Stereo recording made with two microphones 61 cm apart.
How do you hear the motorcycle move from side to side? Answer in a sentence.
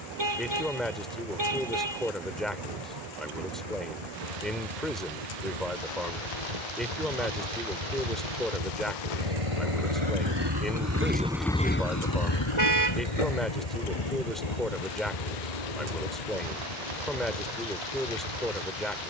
In this clip you hear the motorcycle move to the left.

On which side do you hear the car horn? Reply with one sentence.
In this clip you hear the car horn on the right.